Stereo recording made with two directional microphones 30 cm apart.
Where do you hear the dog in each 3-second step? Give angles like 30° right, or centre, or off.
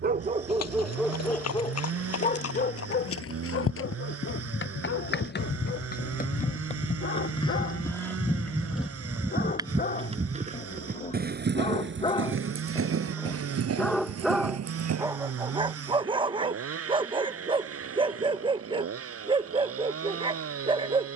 10° left, 40° left, 40° left, 30° left, 10° left, 20° right, 20° right.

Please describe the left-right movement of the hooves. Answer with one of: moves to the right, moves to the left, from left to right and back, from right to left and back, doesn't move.
moves to the right.